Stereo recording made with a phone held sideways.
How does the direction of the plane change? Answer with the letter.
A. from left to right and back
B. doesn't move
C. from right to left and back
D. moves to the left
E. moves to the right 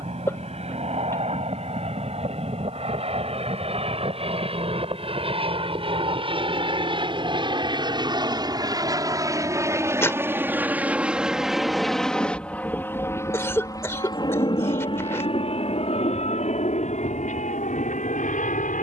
D.